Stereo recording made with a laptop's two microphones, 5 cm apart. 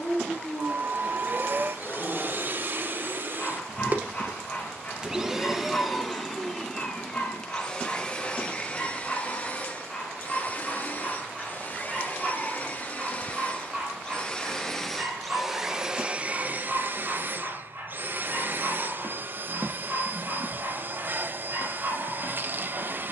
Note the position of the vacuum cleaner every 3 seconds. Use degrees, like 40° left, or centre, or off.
40° right, 20° right, 20° left, 30° left, 30° left, 30° right, 40° right, 40° right.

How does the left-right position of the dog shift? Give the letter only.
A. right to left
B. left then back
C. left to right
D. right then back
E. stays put
C.